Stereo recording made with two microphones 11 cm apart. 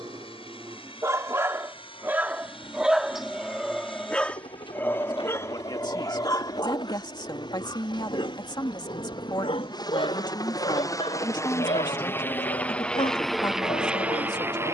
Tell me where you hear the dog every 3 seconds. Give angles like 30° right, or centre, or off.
20° right, 10° left, 40° left, 60° left, 70° left.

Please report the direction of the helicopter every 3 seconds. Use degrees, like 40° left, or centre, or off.
50° left, 50° left, 50° left, 30° left, centre.